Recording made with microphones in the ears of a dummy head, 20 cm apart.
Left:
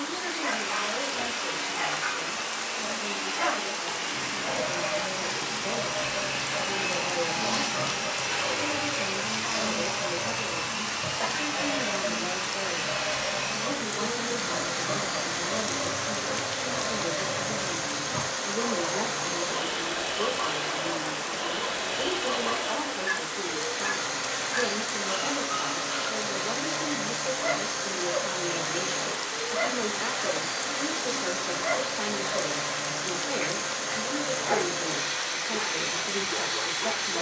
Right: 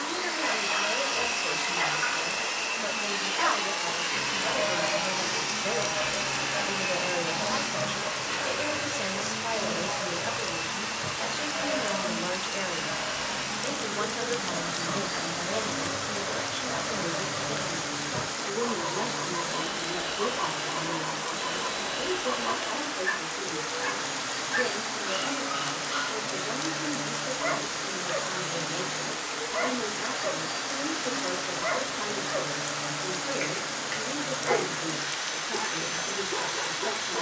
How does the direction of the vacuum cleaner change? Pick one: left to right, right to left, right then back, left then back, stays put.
right to left.